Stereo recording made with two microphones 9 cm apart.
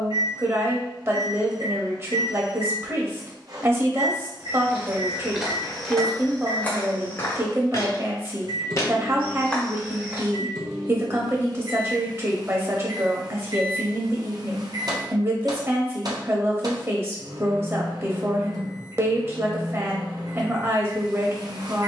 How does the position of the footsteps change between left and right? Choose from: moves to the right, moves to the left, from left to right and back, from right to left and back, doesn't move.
from right to left and back.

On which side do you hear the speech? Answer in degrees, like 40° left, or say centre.
30° right.